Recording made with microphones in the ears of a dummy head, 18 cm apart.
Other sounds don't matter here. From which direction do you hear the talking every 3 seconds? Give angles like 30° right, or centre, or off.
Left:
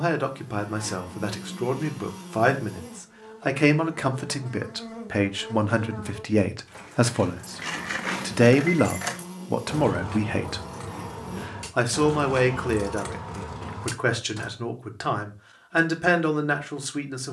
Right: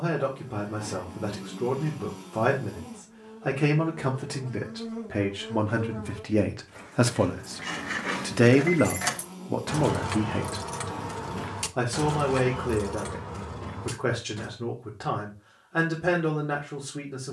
60° left, 40° left, 10° left, 40° left, 60° left, 60° left.